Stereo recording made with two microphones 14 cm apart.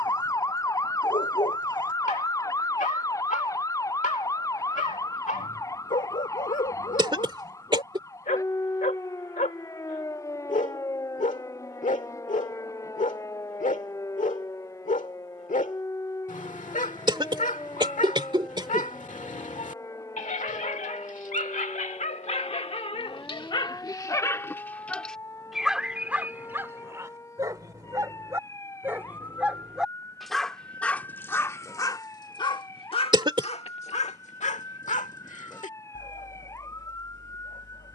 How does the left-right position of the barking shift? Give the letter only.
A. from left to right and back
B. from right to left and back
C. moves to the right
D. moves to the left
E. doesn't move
A.